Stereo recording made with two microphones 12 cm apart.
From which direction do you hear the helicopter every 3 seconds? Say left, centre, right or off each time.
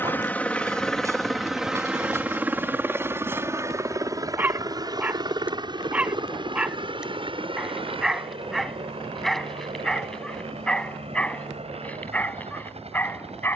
centre, right, right, right, right.